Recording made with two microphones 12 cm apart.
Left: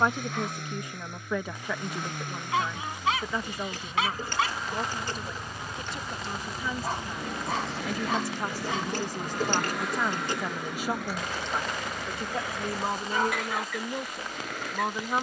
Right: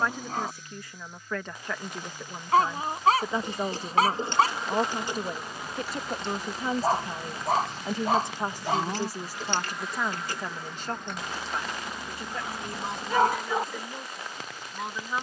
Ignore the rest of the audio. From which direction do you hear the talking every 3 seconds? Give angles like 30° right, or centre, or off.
10° left, 40° right, 30° right, centre, 30° left.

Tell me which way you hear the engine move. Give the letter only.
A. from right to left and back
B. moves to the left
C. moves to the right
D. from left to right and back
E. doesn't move
E.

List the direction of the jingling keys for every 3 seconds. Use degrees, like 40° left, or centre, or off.
off, 20° right, 20° left, 20° left, 30° right.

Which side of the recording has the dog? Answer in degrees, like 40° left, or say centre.
40° right.